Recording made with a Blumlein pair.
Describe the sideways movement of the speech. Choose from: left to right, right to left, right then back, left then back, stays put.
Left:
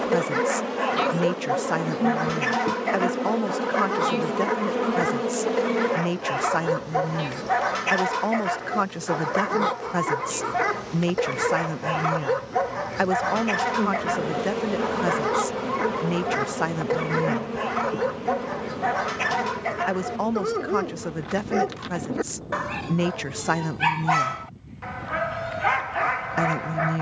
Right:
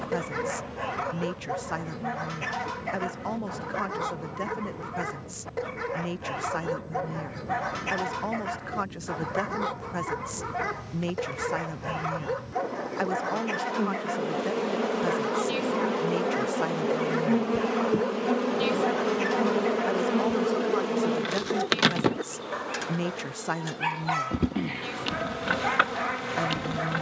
stays put.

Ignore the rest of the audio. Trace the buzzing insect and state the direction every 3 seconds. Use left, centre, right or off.
left, left, left, left, centre, centre, right, right, right.